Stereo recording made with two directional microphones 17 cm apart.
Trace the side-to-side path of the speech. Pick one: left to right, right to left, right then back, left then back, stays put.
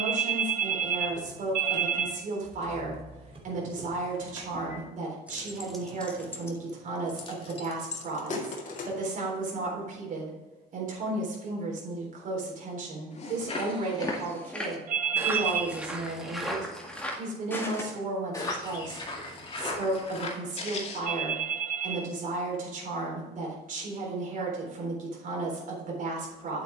stays put.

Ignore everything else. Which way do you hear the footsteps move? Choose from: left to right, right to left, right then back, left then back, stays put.
right then back.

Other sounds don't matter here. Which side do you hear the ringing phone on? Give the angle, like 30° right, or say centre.
50° right.